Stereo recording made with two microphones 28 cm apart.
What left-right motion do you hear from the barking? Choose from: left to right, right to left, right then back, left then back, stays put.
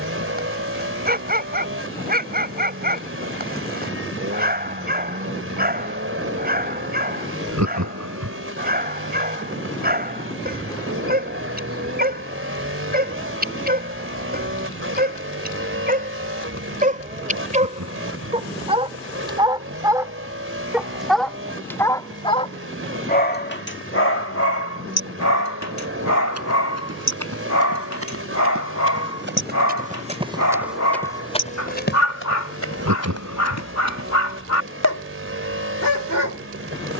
right to left.